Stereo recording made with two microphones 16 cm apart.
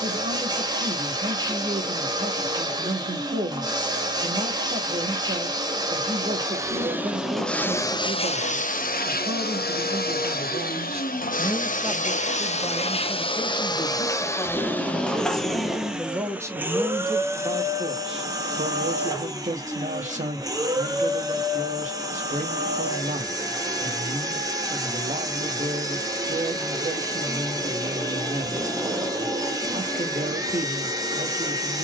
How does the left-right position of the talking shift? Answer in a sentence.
You can hear the talking move from right to left and back again.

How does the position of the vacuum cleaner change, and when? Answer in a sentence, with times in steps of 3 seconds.
In this clip you hear the vacuum cleaner on the right from 0 s, in the centre from 6 s, on the left from 9 s, in the centre from 15 s and on the right from 18 s.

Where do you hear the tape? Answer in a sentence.
You can hear the tape in the centre.